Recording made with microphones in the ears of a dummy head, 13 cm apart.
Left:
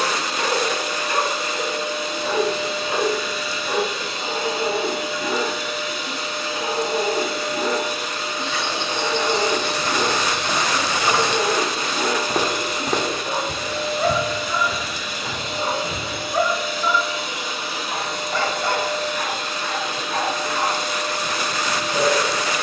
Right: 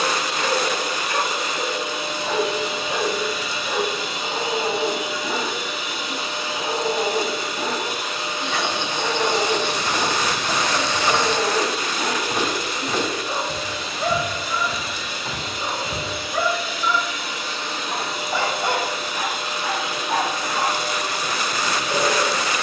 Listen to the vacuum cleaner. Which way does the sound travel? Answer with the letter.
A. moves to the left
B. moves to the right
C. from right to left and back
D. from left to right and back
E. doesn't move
C.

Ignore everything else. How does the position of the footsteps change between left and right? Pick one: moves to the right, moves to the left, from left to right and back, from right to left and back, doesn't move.
moves to the left.